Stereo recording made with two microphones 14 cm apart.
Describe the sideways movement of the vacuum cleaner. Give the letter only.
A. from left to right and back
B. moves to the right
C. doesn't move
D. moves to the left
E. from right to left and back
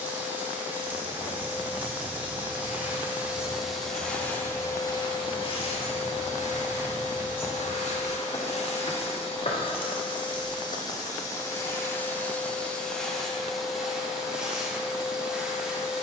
E.